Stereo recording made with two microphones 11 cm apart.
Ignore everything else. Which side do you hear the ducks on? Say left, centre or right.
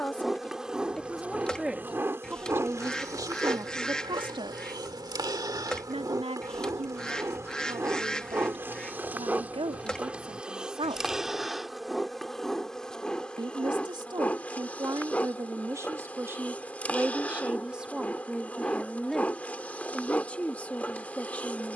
centre.